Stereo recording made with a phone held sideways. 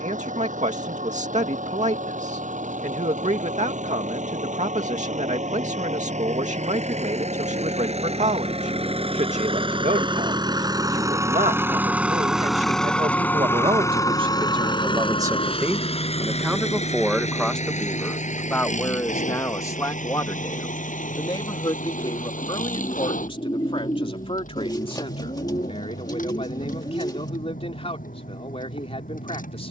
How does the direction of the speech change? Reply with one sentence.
In this clip you hear the speech go from the right side to the left.